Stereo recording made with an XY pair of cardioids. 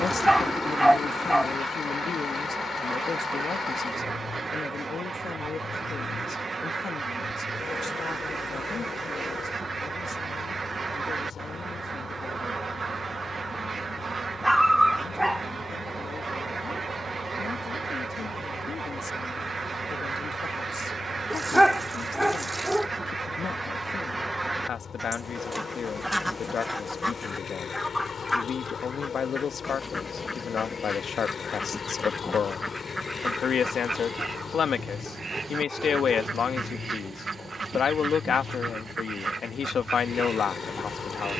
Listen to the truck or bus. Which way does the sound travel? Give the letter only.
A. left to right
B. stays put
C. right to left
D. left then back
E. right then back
B.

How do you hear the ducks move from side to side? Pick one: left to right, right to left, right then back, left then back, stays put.
left then back.